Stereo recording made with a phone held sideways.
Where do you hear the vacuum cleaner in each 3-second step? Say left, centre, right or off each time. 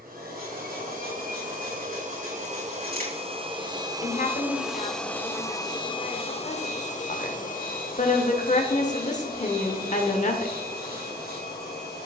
right, centre, left, left.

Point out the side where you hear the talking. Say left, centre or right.
left.